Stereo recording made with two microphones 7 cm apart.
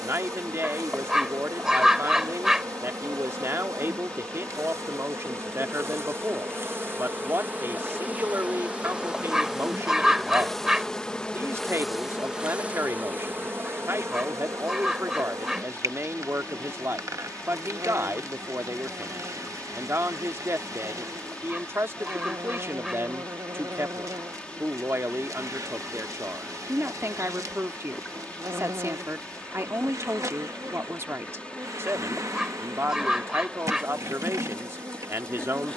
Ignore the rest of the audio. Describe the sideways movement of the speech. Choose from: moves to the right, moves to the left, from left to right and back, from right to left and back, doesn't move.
doesn't move.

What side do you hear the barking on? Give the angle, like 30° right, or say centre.
10° right.